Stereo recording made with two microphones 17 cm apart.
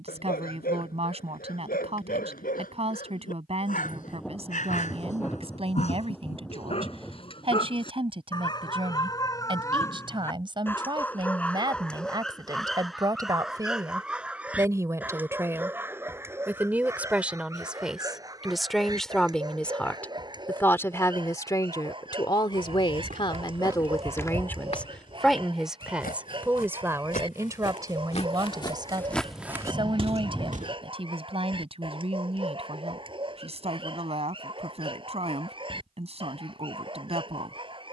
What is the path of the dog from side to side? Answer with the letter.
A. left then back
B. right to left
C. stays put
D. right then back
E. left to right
E.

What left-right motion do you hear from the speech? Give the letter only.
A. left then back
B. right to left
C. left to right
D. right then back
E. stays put
A.